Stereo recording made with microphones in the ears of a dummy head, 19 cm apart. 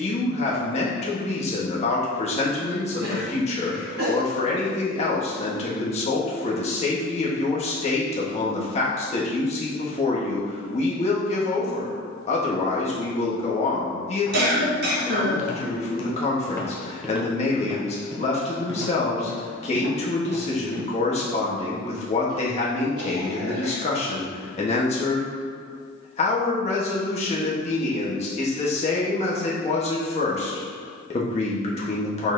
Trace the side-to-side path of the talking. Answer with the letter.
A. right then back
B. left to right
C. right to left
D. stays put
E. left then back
D.